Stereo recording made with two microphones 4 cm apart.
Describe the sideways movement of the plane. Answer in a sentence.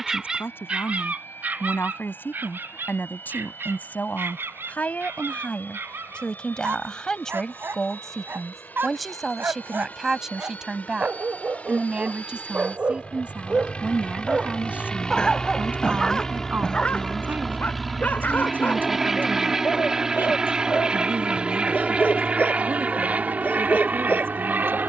You can hear the plane travel towards the right.